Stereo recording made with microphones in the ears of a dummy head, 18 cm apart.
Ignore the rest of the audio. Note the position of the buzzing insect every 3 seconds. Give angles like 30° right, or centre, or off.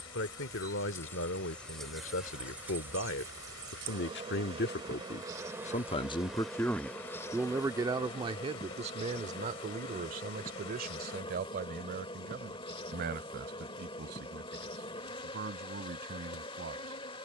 10° left, 20° right, 10° left, 30° left, 30° left, 30° left.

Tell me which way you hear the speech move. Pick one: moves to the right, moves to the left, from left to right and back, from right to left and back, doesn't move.
moves to the right.